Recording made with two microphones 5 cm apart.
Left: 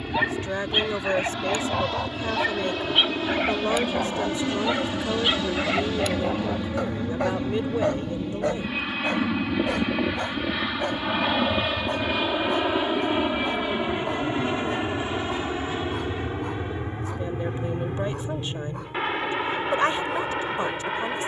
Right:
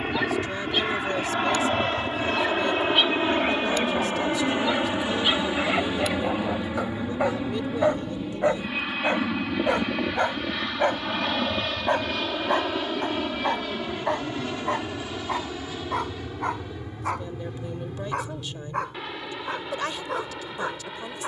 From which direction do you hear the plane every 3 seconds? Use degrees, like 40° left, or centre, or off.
40° right, 30° right, 10° right, 10° left, 20° left, 30° left, 40° left.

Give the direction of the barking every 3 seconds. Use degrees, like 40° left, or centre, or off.
20° left, 10° left, 10° right, 40° right, 60° right, 70° right, 80° right.